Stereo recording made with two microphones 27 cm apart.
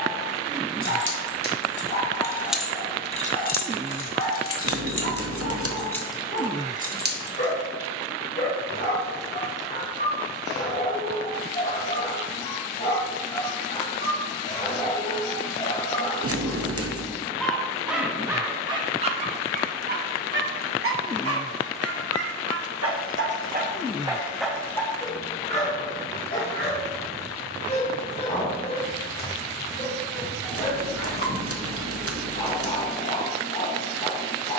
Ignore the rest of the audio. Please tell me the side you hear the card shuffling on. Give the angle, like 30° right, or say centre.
60° right.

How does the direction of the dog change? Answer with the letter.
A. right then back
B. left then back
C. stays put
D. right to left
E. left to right
A.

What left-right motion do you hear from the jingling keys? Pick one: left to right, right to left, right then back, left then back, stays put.
left then back.